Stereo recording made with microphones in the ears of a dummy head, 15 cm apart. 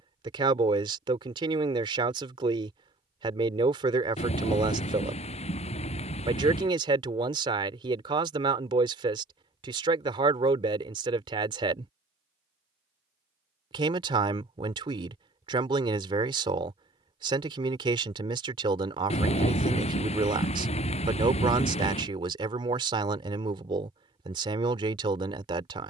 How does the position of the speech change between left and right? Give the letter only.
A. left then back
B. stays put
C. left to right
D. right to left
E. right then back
B.